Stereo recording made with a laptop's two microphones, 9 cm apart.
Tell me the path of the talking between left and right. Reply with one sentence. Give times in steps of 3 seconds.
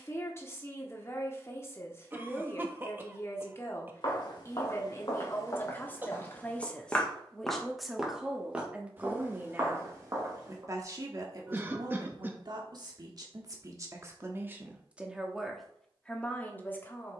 You can hear the talking on the left from 0 s, in the centre from 6 s, on the right from 9 s and in the centre from 15 s.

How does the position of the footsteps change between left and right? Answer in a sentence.
You can hear the footsteps go from the left side to the right.